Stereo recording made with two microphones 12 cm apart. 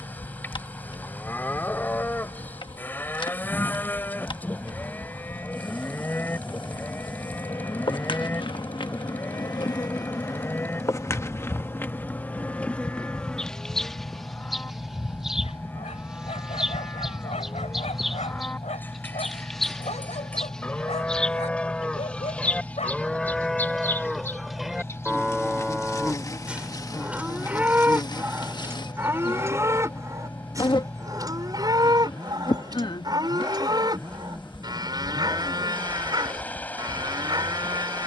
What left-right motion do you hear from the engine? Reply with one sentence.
You can hear the engine stay put.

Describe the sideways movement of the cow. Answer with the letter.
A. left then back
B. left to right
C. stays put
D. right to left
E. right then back
B.